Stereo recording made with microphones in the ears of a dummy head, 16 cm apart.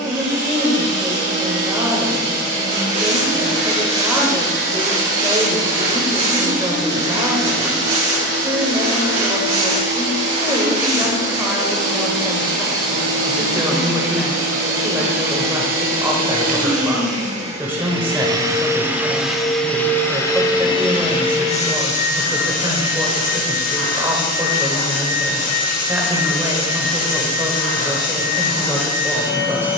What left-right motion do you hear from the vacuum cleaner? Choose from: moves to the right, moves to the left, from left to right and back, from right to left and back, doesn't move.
moves to the left.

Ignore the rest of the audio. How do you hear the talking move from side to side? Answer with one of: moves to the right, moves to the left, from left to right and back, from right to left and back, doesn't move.
doesn't move.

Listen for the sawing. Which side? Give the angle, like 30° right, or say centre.
40° right.